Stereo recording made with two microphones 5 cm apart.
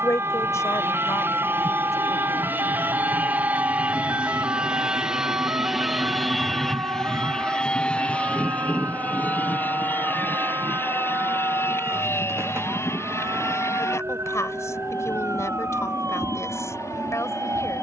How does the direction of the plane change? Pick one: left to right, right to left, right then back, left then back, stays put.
right to left.